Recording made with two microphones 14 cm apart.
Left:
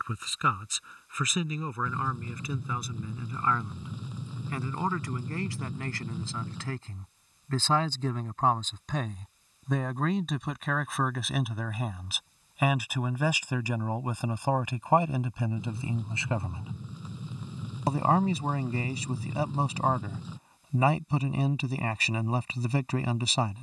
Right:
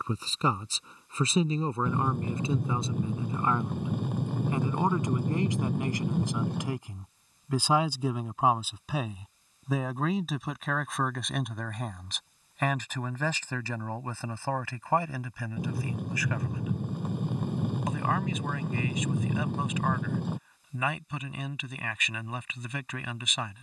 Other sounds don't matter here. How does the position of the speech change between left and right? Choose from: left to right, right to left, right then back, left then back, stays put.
right to left.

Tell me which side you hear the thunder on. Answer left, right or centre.
right.